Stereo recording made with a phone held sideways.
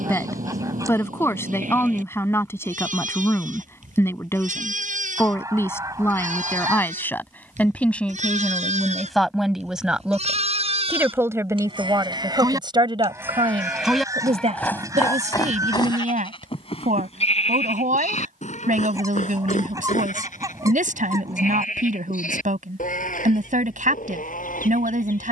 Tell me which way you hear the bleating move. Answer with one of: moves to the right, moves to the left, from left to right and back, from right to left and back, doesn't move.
moves to the left.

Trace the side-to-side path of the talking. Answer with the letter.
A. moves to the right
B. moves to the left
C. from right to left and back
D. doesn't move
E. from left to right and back
A.